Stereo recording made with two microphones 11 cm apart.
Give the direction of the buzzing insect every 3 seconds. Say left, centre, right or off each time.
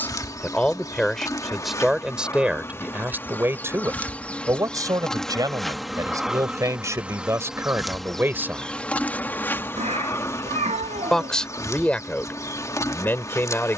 left, centre, centre, left, left.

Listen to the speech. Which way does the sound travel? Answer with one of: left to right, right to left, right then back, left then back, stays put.
right then back.